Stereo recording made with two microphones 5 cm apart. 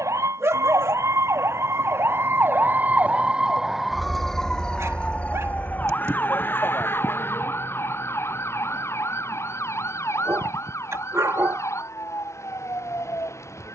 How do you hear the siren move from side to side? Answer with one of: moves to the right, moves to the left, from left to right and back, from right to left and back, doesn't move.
moves to the left.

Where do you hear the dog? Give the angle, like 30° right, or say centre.
60° right.